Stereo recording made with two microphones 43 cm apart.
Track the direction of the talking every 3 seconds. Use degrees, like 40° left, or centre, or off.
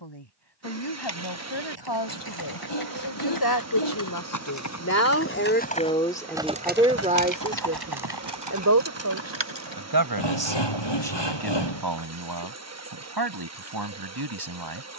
70° left, 40° left, 20° right, 60° right, 60° right.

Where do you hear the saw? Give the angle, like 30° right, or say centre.
70° left.